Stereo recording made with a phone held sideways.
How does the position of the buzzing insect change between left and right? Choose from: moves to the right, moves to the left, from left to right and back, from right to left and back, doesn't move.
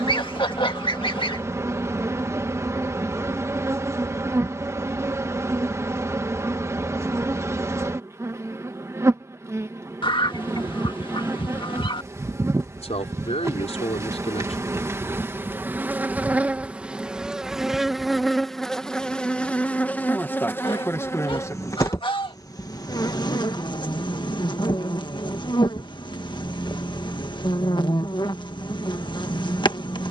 moves to the left.